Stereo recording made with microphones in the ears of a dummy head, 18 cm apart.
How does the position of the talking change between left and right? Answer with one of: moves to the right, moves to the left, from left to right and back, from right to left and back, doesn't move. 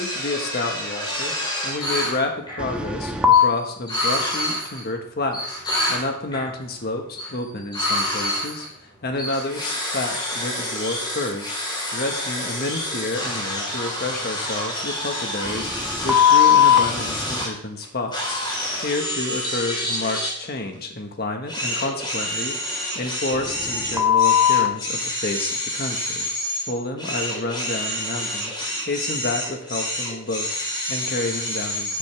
doesn't move.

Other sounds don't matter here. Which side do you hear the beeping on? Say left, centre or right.
centre.